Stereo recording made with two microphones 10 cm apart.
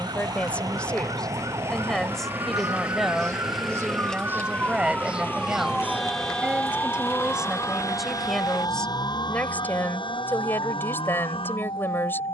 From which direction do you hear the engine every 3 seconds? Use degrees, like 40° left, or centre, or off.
30° right, 10° left, 40° left, 50° left.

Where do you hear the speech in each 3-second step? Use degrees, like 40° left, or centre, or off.
10° left, 10° right, 10° right, 20° left.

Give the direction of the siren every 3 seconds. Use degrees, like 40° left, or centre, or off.
40° right, 20° right, 30° left, 60° left.